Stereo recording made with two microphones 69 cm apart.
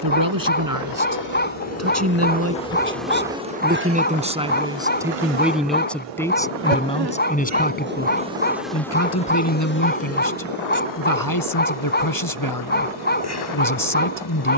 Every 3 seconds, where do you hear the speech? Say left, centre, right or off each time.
right, centre, centre, left, left.